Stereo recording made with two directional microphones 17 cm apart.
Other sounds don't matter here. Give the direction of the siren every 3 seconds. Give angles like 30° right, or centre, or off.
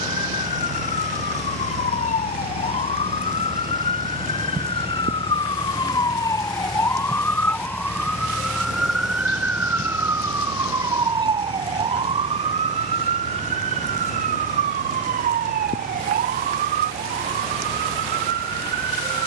40° left, 30° left, 10° left, 20° right, 40° right, 60° right, 70° right.